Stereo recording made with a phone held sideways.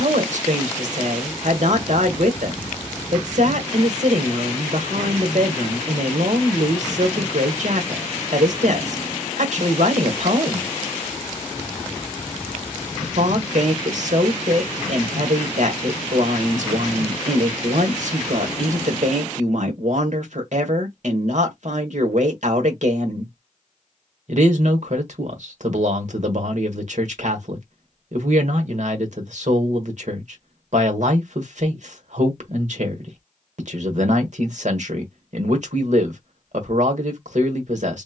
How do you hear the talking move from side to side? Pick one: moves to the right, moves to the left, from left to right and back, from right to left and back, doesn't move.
doesn't move.